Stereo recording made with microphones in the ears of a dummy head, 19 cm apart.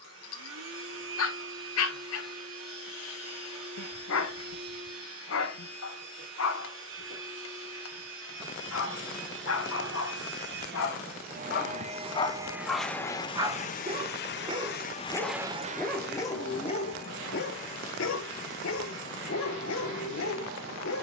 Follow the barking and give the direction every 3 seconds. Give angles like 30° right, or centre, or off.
70° left, 70° left, 70° left, 70° left, 10° right, 20° left, 70° left.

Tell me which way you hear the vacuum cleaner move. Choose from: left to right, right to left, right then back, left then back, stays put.
left then back.